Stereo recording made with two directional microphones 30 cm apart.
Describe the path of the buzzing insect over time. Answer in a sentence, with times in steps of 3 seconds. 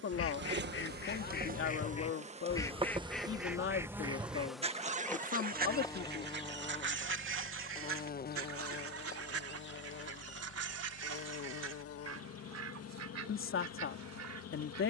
You can hear the buzzing insect on the right from 0 s, in the centre from 3 s and on the left from 6 s.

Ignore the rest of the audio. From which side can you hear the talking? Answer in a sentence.
You can hear the talking on the left.